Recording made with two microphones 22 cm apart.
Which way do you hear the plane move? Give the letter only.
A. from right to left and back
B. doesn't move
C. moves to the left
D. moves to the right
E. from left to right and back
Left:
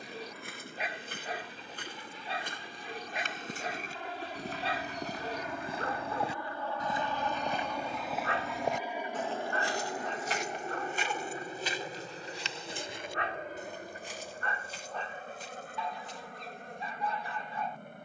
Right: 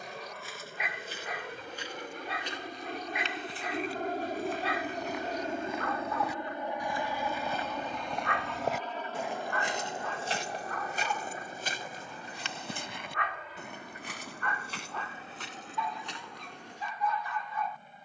C.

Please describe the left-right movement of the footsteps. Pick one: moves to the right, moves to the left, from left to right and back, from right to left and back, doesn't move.
moves to the right.